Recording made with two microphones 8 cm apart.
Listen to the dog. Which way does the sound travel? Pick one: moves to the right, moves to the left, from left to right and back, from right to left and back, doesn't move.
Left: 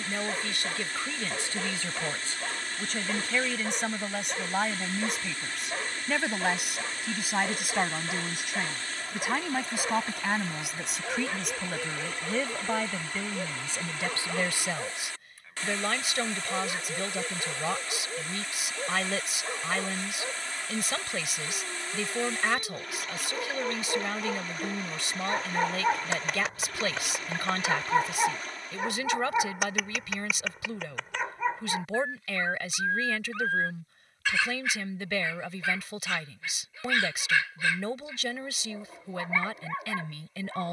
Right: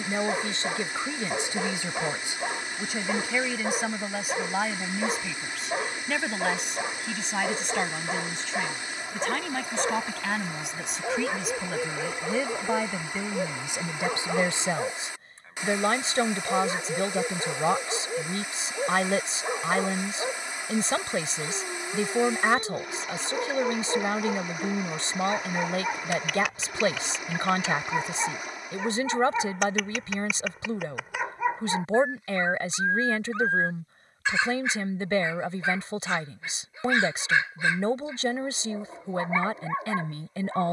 from right to left and back.